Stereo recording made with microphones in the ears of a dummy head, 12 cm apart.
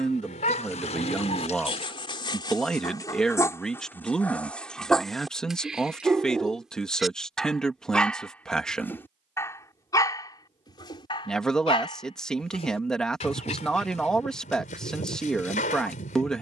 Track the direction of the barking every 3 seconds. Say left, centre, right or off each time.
left, centre, centre, left, left, left.